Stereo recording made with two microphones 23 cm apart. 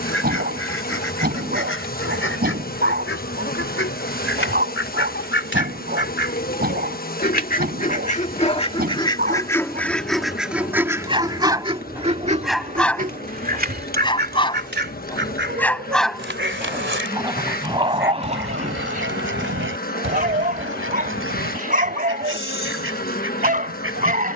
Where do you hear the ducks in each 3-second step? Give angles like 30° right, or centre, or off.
70° left, 60° left, 40° left, centre, 40° right, 60° right, 70° right, 70° right.